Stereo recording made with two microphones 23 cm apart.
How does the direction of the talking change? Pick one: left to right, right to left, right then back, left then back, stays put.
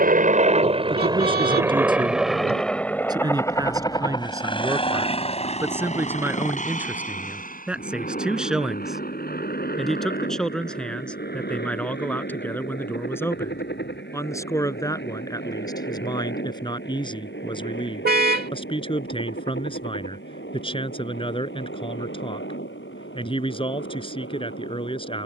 right to left.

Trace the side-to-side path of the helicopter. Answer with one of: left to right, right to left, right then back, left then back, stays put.
right to left.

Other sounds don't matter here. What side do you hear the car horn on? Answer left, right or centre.
right.